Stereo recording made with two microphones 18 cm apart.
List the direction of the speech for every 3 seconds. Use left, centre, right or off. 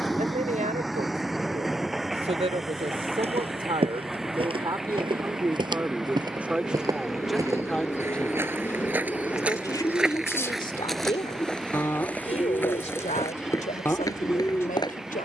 right, right, centre, left, left.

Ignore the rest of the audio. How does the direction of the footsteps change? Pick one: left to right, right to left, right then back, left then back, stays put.
right to left.